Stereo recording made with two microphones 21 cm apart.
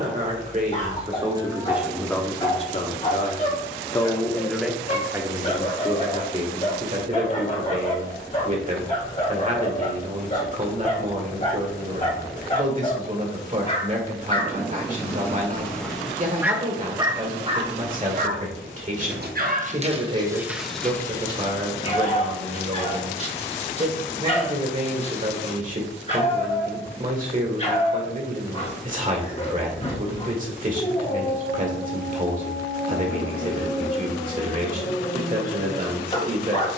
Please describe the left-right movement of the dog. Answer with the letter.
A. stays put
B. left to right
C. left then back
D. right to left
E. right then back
E.